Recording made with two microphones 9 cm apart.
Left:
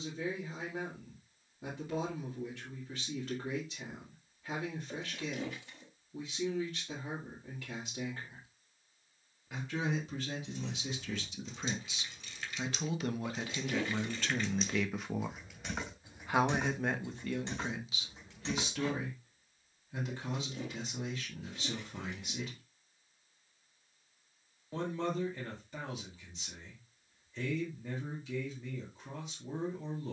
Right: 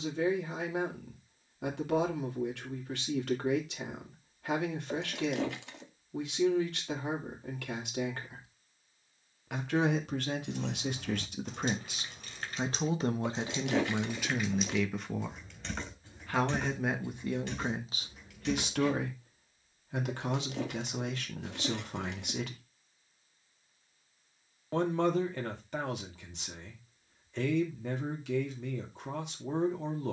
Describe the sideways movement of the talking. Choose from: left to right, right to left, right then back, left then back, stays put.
left then back.